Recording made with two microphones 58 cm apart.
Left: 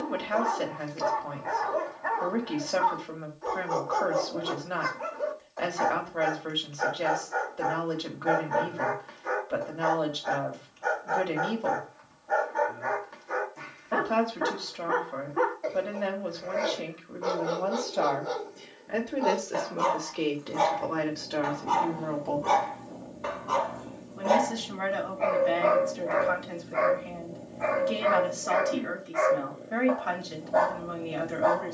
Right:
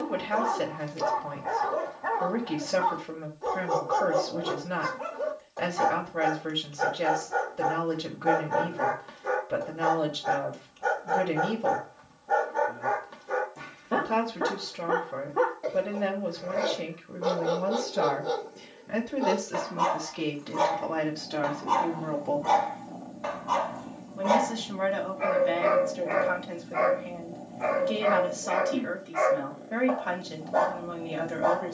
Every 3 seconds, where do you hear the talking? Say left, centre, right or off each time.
right, right, right, right, right, right, right, centre, centre, centre, centre.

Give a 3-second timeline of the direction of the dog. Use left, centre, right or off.
right, right, right, right, right, right, right, centre, right, right, right.